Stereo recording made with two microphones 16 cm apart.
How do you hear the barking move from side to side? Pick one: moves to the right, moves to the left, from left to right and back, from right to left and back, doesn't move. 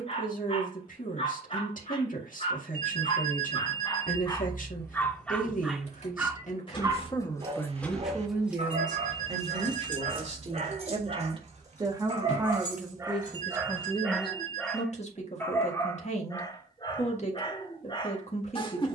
from left to right and back.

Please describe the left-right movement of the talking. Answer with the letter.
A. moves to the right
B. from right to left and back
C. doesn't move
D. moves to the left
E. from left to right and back
E.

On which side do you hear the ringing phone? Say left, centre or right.
right.